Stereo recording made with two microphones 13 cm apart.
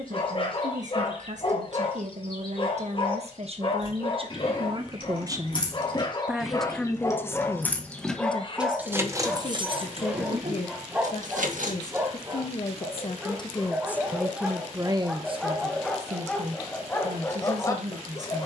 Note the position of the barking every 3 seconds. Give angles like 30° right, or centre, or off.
40° left, 40° left, 20° left, 10° right, 10° right, 10° left.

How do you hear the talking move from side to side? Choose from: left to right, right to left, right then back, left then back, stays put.
left then back.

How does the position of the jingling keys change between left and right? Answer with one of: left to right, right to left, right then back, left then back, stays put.
left to right.